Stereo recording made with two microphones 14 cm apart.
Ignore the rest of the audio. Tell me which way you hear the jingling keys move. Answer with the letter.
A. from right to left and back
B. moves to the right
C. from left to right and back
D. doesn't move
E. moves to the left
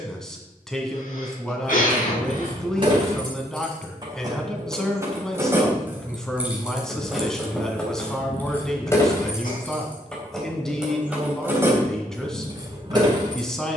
A.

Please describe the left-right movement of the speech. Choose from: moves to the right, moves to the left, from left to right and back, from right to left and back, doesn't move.
doesn't move.